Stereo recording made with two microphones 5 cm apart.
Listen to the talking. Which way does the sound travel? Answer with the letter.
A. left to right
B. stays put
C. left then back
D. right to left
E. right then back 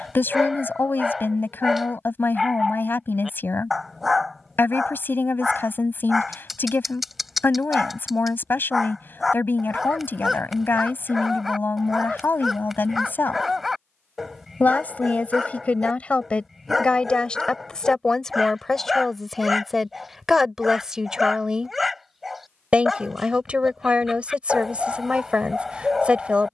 A.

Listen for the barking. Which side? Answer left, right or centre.
centre.